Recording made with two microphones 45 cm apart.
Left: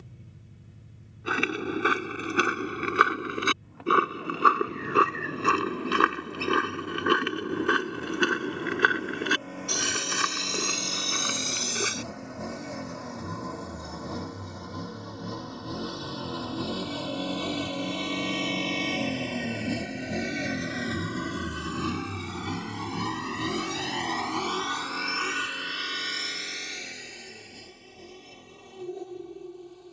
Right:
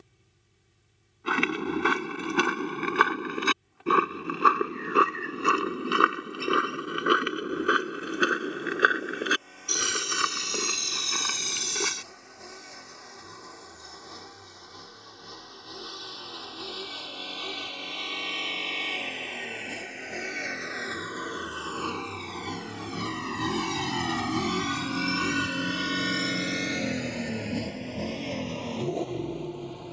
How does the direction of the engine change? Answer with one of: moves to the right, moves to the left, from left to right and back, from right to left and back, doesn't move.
moves to the right.